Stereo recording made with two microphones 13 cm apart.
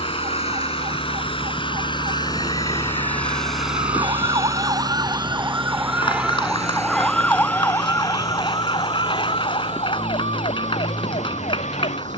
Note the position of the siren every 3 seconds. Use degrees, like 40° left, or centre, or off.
50° right, 30° right, 10° left, 50° left.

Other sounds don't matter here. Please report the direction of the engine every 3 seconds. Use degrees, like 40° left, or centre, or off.
40° left, 20° right, 60° right, 70° right.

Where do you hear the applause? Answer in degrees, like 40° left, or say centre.
40° left.